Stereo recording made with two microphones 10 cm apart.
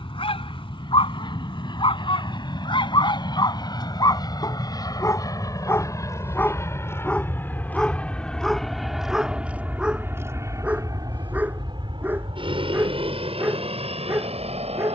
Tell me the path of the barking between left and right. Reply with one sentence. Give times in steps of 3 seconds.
You can hear the barking on the left from 0 s, in the centre from 6 s and on the right from 12 s.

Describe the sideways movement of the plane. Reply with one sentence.
In this clip you hear the plane move to the right.